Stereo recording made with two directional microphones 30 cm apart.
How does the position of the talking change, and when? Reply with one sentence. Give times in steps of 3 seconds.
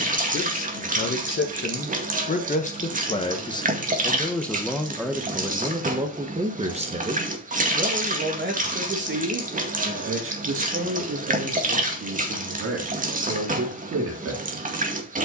In this clip you hear the talking on the left from 0 s, in the centre from 3 s and on the right from 6 s.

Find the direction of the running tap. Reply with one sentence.
You can hear the running tap on the right.